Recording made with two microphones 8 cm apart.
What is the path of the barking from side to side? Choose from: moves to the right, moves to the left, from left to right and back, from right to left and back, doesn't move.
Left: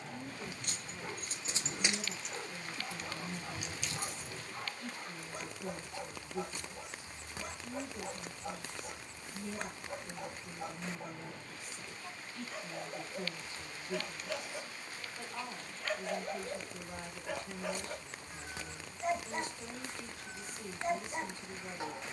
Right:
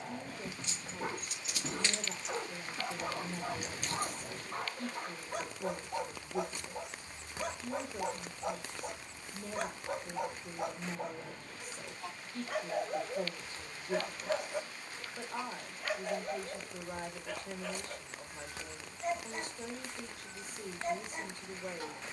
moves to the left.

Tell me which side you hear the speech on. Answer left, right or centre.
right.